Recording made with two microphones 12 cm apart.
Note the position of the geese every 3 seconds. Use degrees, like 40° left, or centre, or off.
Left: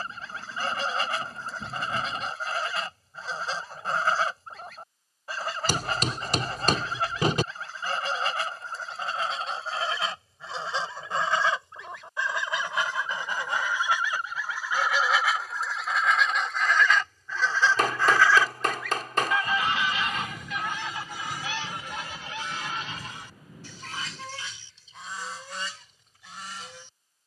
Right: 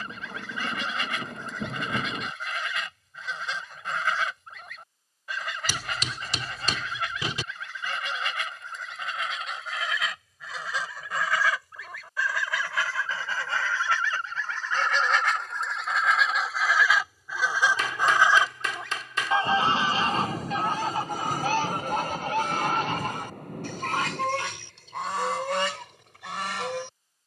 40° left, 40° left, 40° left, 30° left, 20° left, centre, 30° right, 50° right, 70° right.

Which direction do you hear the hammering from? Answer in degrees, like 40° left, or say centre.
50° left.